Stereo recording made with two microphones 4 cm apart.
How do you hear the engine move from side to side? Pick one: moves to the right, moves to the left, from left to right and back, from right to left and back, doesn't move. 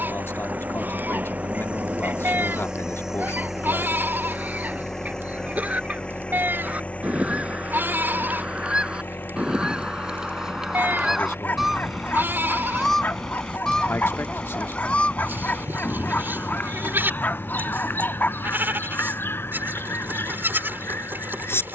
moves to the left.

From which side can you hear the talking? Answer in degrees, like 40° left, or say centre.
70° left.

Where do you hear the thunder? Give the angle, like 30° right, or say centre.
50° right.